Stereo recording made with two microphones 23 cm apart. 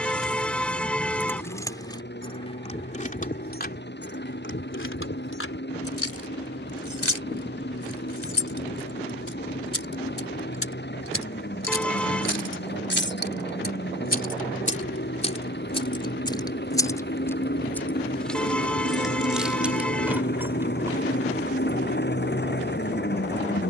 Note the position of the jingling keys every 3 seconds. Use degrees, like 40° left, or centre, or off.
10° left, 50° left, 80° left, 70° left, 40° left, 20° left, centre, off.